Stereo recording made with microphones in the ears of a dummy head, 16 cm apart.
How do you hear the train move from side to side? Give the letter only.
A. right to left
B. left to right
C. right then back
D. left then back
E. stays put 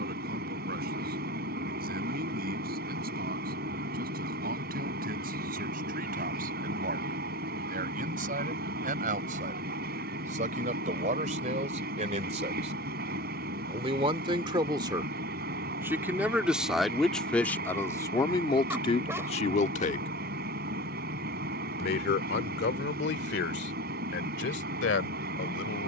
E.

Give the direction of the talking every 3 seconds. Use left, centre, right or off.
right, right, right, right, right, centre, left, left, left.